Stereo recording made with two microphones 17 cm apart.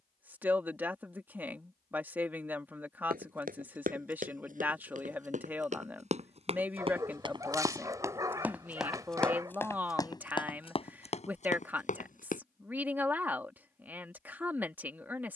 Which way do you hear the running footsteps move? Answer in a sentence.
In this clip you hear the running footsteps travel towards the left.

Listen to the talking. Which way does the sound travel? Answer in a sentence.
You can hear the talking stay put.